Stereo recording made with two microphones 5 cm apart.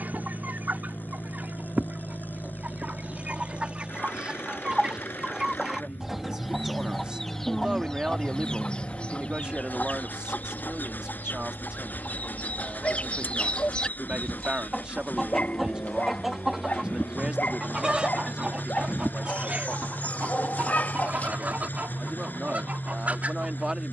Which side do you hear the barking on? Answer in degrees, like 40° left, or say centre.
40° left.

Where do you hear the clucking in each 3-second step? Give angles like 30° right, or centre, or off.
30° right, 20° right, 10° left, 40° left, 20° left, 10° right, 30° right, 30° right.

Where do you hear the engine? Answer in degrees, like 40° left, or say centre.
40° left.